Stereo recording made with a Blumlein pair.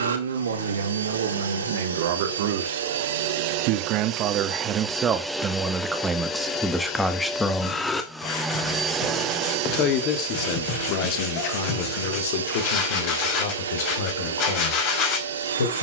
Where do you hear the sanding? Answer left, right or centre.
left.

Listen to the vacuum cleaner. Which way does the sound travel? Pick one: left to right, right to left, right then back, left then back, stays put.
left then back.